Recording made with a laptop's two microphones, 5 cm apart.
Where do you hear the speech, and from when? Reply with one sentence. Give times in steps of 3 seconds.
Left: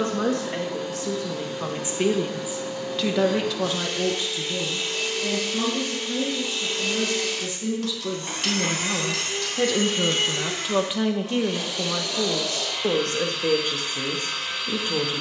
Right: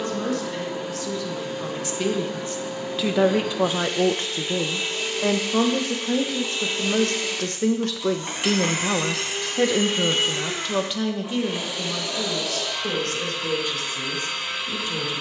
You can hear the speech on the left from 0 s, on the right from 3 s, in the centre from 9 s and on the left from 12 s.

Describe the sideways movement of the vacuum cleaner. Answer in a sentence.
In this clip you hear the vacuum cleaner stay in one place.